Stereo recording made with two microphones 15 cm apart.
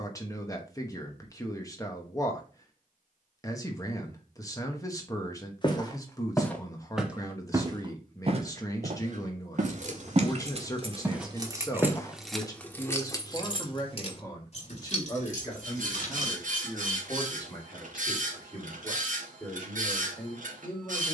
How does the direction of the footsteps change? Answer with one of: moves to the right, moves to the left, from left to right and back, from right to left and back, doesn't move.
from left to right and back.